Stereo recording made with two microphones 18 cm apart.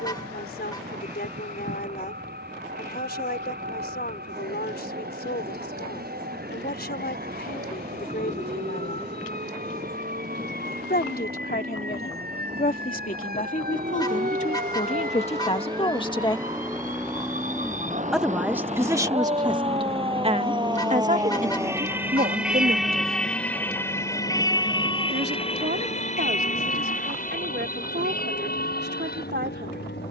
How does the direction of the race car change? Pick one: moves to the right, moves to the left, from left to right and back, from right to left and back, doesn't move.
moves to the left.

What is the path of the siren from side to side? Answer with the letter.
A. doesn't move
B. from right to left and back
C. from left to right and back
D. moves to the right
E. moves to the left
E.